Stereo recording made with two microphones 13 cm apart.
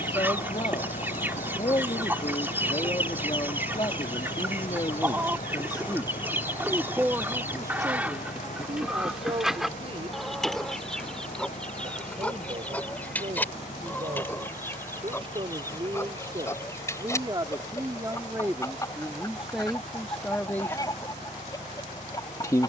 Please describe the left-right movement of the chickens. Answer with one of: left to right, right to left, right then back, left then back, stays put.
right to left.